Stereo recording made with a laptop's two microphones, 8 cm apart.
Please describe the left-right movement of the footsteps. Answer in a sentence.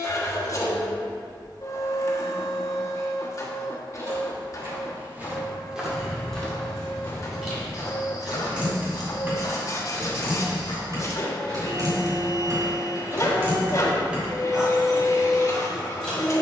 You can hear the footsteps go from the right side to the left.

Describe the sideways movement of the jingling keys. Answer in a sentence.
In this clip you hear the jingling keys go right and come back.